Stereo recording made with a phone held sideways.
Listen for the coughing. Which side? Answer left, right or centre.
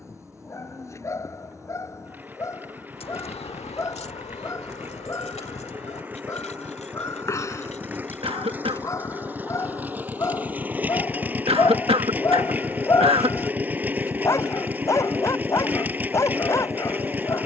right.